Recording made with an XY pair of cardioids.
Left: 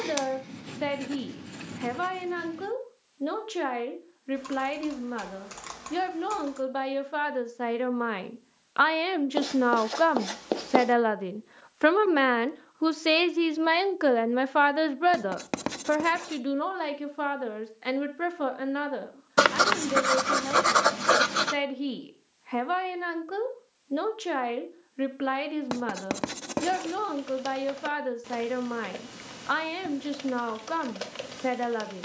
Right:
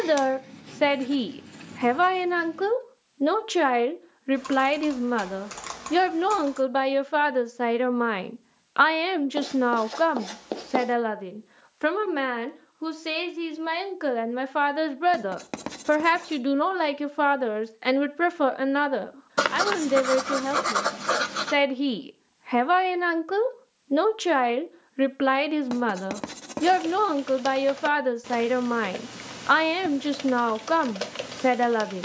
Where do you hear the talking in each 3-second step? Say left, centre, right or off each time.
right, right, right, centre, left, right, right, right, right, right, right.